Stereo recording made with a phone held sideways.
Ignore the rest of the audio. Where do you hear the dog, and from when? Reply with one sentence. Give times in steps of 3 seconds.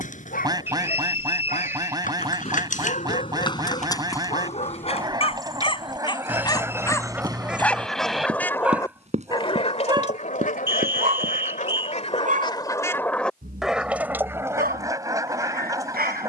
You can hear the dog on the left from 0 s, in the centre from 6 s and on the right from 9 s.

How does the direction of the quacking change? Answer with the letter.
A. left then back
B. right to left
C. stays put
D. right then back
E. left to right
A.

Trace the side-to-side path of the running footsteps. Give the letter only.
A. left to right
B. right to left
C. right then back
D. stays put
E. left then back
A.